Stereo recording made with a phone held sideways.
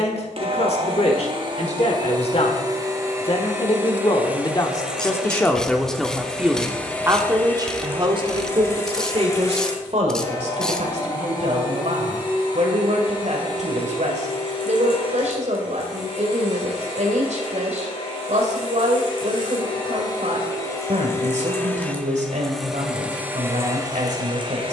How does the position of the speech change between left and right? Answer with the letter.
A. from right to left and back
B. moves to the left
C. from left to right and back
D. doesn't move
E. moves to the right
E.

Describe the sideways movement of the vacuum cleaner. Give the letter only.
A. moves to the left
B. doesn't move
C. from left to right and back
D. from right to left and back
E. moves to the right
D.